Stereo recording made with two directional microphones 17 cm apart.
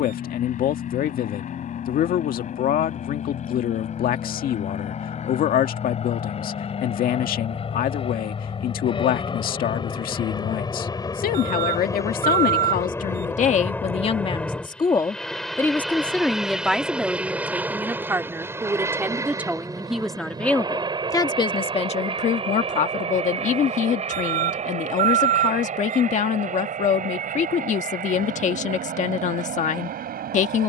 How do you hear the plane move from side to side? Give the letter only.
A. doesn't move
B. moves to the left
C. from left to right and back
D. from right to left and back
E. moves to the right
E.